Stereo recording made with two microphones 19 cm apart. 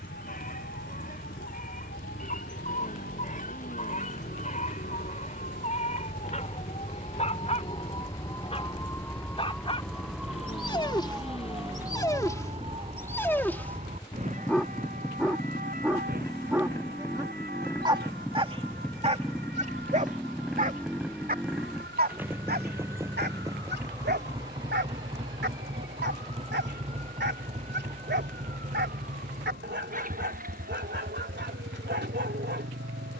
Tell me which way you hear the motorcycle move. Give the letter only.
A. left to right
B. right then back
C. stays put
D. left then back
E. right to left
A.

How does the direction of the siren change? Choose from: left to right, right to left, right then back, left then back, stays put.
left to right.